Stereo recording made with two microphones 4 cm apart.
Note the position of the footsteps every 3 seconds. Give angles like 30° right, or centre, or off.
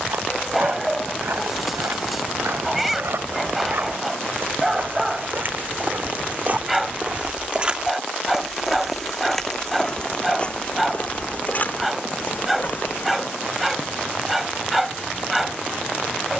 70° right, 60° right, 30° right, 30° left, 50° left, off.